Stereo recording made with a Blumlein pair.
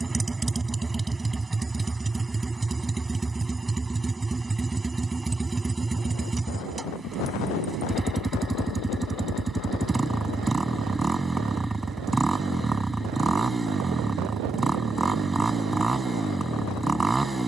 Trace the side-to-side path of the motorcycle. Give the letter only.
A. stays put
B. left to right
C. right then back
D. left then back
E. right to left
A.